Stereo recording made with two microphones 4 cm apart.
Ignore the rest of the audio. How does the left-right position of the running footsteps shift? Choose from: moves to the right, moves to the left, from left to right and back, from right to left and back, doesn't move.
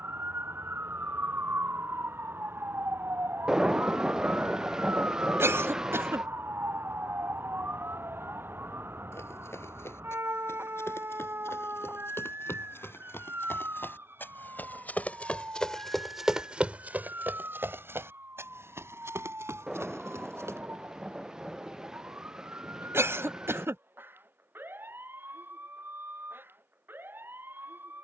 moves to the right.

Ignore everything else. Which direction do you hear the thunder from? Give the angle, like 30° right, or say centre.
10° right.